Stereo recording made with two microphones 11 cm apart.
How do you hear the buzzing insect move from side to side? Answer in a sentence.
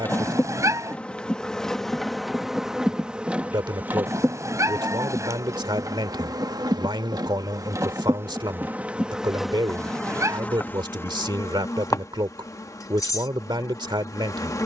In this clip you hear the buzzing insect go right and come back.